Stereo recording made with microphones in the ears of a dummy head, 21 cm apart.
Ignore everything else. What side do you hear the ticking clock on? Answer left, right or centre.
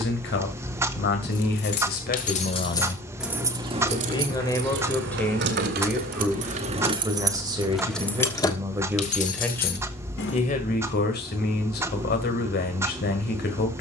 centre.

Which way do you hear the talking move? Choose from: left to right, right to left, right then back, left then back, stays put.
right then back.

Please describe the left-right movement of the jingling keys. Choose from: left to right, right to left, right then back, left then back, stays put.
right then back.